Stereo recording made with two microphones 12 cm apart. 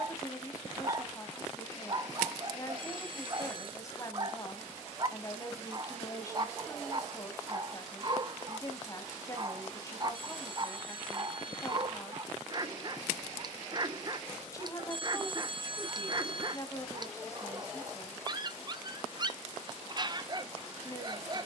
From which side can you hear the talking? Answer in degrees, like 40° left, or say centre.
20° left.